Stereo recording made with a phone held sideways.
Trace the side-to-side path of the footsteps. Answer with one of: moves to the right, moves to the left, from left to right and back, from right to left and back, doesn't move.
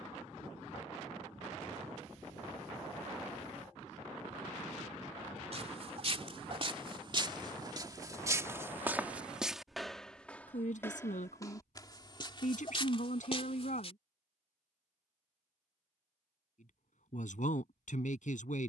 moves to the left.